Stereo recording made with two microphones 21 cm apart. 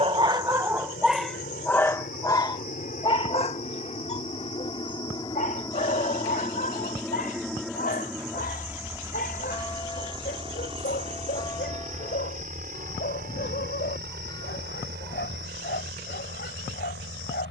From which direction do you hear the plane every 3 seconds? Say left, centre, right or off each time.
left, left, centre, right, right, right.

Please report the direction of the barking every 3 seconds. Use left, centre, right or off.
centre, left, left, left, left, left.